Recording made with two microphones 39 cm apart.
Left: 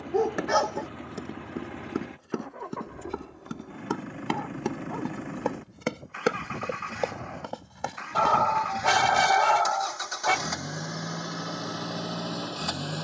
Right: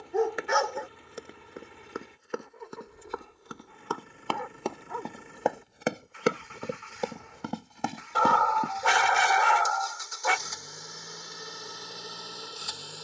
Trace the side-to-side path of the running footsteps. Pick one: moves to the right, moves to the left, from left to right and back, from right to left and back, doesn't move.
moves to the right.